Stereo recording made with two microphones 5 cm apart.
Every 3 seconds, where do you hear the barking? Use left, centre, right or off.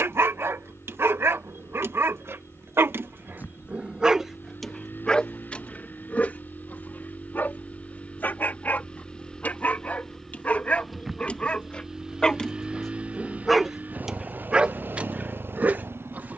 right, centre, left, left, centre, right.